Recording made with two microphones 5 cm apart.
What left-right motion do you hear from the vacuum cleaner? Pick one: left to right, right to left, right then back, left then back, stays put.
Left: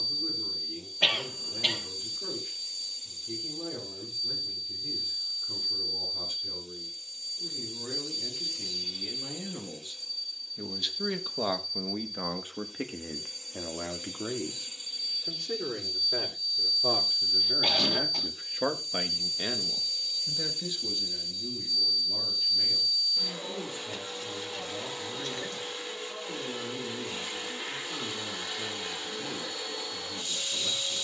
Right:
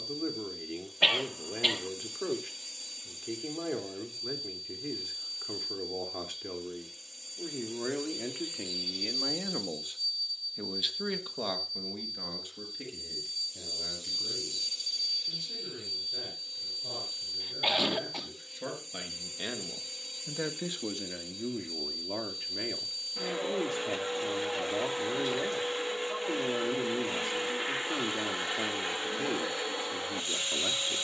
left then back.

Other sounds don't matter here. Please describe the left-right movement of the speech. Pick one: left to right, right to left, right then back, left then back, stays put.
left then back.